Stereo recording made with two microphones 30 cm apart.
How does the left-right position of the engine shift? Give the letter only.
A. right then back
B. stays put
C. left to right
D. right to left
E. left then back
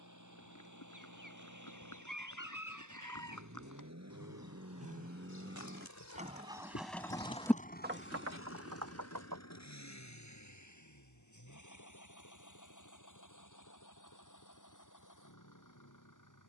D.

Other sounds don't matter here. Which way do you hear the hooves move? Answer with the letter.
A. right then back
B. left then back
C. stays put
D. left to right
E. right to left
D.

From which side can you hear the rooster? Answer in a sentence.
You can hear the rooster on the right.